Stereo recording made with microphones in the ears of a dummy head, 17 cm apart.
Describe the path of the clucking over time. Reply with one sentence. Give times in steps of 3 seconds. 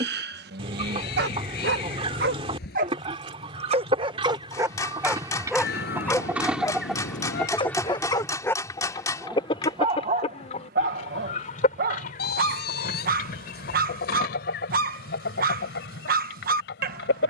You can hear the clucking on the right from 0 s, in the centre from 6 s and on the left from 9 s.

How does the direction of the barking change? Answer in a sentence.
You can hear the barking go left and come back.